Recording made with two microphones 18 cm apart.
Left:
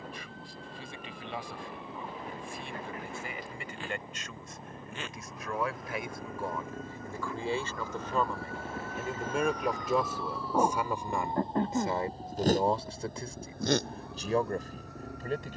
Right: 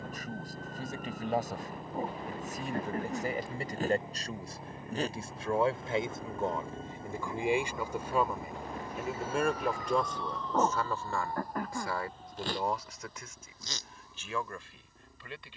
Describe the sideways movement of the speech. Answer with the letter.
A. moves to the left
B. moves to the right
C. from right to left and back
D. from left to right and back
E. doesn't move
A.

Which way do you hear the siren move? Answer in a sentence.
You can hear the siren travel towards the left.